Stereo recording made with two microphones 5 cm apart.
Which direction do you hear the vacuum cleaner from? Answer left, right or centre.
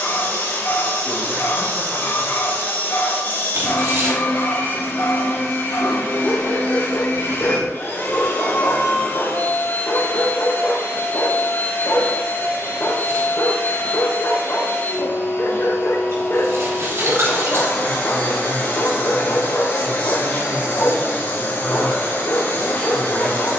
left.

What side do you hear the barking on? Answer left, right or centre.
left.